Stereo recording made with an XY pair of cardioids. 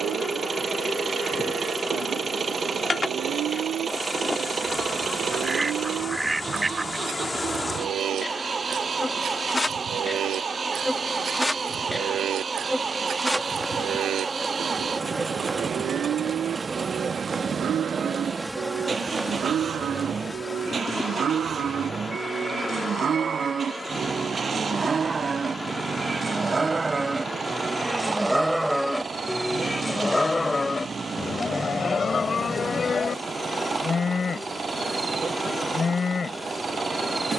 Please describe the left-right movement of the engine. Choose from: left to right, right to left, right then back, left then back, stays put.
stays put.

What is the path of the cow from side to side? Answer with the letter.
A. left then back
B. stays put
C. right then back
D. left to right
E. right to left
E.